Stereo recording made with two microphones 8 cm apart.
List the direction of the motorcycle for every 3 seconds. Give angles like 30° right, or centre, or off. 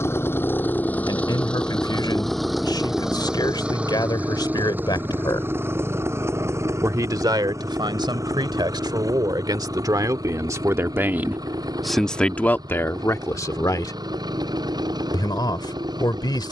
10° left, 20° right, 40° right, 50° right, 60° right, 60° right.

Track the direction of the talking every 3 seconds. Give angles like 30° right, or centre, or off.
60° left, 60° left, 60° right, 40° right, 30° left, 60° left.